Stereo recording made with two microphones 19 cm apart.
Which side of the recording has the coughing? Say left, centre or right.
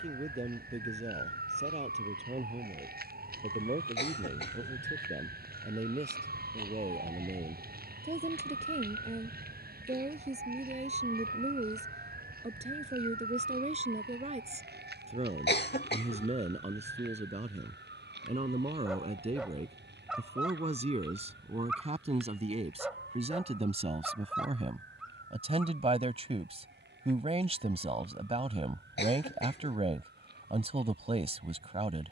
left.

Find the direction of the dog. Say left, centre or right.
centre.